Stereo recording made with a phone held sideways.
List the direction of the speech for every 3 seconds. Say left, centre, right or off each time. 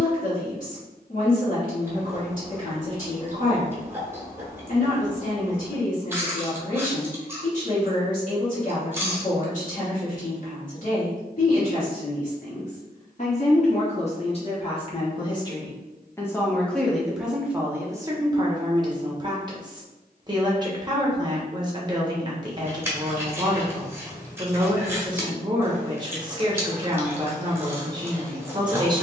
left, left, left, left, left, centre, right, right, right, right.